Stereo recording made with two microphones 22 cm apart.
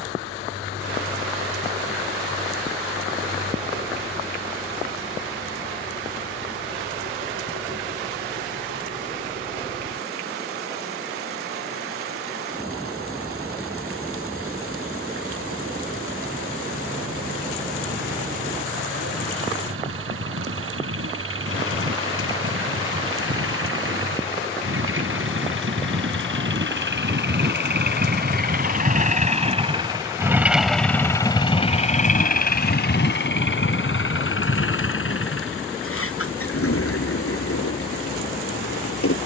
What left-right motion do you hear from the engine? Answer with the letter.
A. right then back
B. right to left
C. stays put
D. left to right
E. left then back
B.